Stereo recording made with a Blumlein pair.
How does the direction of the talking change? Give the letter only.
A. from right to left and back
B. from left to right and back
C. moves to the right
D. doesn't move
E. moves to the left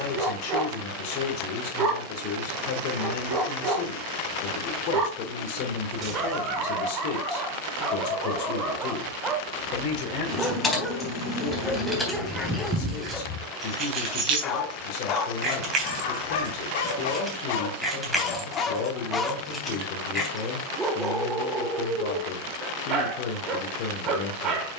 D.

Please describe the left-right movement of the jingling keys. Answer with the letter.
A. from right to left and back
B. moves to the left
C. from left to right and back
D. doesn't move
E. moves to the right
C.